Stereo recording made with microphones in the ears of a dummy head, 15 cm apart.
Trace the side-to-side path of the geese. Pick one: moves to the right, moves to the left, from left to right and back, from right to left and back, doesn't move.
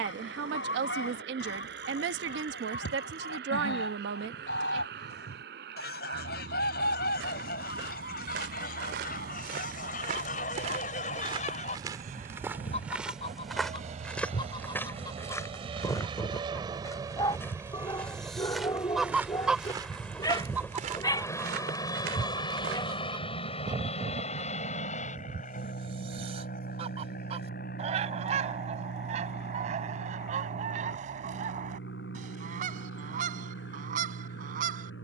moves to the right.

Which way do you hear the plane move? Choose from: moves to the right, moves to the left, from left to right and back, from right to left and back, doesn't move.
moves to the left.